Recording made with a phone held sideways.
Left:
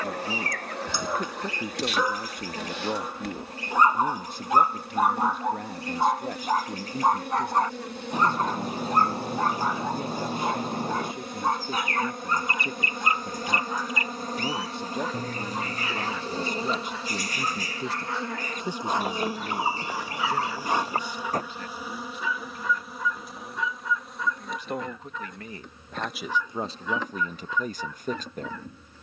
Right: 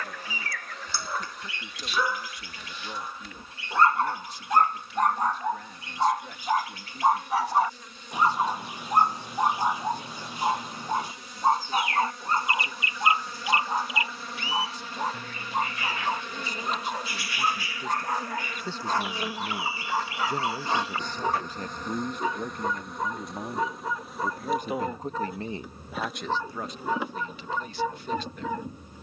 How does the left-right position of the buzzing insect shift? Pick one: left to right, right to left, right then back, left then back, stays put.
left to right.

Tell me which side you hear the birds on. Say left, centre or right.
left.